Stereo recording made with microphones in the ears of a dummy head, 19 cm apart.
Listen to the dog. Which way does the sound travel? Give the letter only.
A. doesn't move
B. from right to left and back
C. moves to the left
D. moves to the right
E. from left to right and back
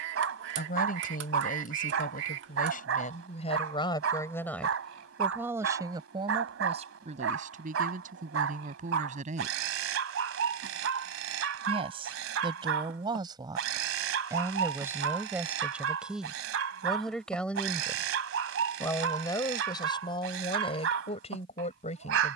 A.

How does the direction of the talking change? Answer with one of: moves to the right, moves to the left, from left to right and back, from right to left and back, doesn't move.
from left to right and back.